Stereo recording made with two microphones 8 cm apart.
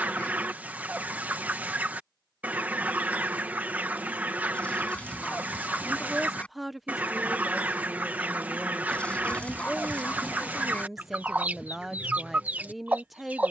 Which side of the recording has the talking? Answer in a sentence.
You can hear the talking in the centre.